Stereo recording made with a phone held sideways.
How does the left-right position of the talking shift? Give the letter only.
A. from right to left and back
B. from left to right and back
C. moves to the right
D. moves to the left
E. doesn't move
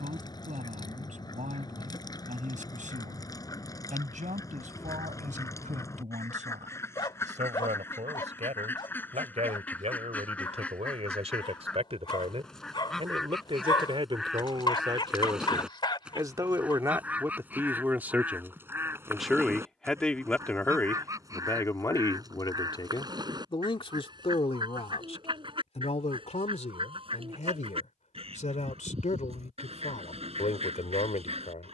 D.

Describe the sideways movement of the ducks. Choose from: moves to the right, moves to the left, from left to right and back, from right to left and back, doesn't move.
moves to the right.